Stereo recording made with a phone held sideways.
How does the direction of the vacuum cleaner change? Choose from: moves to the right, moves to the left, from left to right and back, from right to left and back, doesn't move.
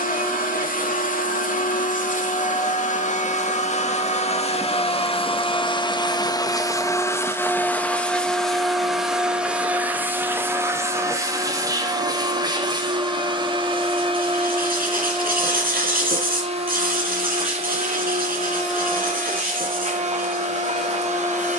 moves to the right.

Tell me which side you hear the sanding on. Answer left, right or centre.
right.